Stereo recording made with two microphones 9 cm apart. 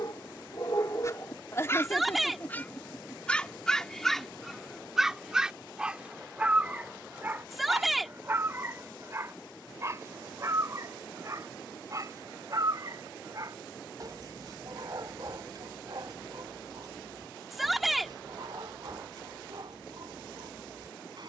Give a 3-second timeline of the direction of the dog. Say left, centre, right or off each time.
left, centre, right, right, right, right, right.